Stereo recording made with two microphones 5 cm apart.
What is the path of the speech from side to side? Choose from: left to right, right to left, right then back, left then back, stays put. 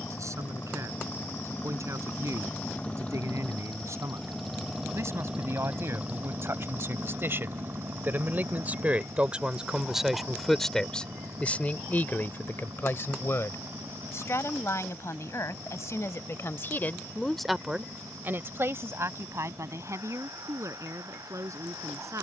left then back.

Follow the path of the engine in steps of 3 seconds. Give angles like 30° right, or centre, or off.
40° left, centre, 40° right, 60° right, 70° right, 80° right, 80° right, 80° right.